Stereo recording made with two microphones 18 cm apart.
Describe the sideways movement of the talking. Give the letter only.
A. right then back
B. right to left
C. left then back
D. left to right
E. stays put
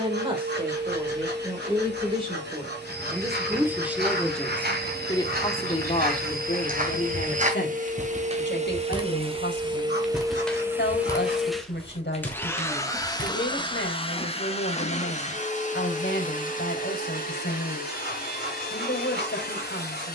B.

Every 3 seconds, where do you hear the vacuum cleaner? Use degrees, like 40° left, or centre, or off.
70° right, 60° right, 50° right, 20° right, 20° left, 50° left, 60° left.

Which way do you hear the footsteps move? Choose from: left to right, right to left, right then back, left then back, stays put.
right to left.